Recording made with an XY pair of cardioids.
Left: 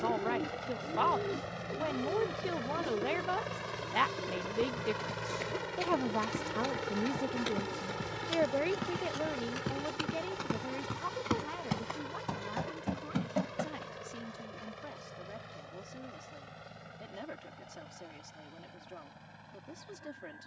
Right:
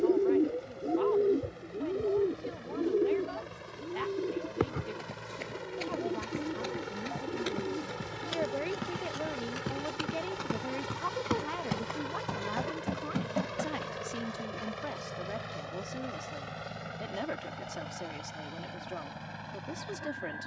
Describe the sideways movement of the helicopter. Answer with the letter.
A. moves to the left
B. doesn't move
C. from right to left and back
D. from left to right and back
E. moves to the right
E.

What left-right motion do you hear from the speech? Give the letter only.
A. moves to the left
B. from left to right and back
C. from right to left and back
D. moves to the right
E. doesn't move
D.